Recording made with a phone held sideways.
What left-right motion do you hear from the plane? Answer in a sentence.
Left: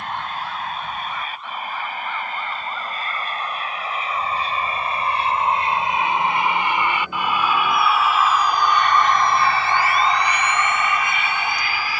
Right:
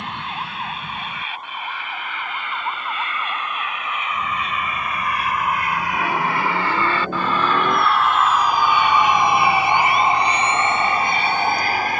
You can hear the plane move to the right.